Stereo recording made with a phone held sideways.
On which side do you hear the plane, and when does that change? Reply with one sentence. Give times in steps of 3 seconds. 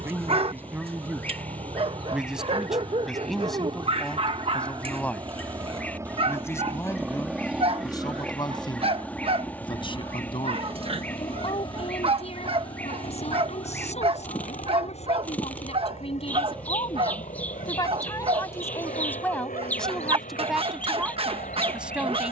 You can hear the plane on the right from 0 s, in the centre from 6 s and on the left from 9 s.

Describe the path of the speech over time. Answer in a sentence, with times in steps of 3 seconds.
In this clip you hear the speech in the centre from 0 s, on the left from 6 s and in the centre from 18 s.